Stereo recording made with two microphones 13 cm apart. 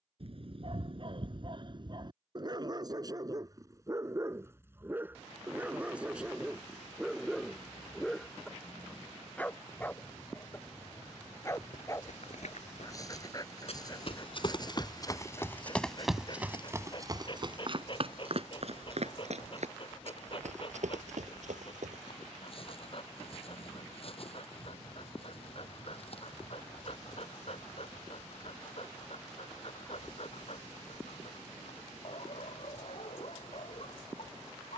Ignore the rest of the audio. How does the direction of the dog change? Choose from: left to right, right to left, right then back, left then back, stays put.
right to left.